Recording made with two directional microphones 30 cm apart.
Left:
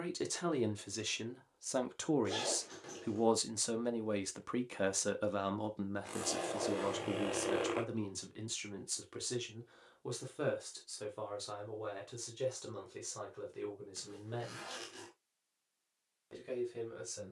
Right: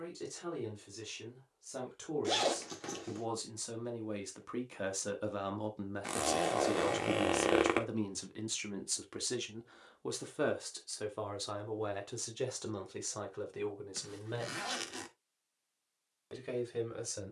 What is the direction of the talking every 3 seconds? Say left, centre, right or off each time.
left, left, centre, right, right, right.